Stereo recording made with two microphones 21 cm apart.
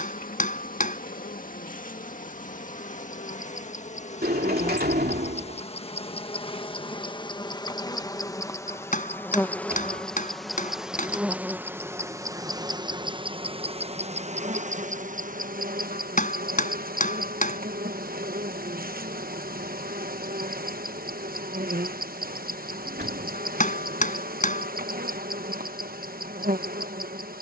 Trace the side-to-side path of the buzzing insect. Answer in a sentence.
In this clip you hear the buzzing insect move to the right.